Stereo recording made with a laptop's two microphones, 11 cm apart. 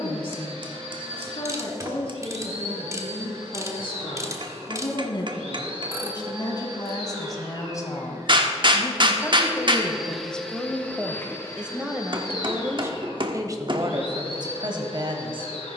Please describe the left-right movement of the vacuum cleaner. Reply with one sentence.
In this clip you hear the vacuum cleaner travel towards the left.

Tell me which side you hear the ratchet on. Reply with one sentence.
In this clip you hear the ratchet on the right.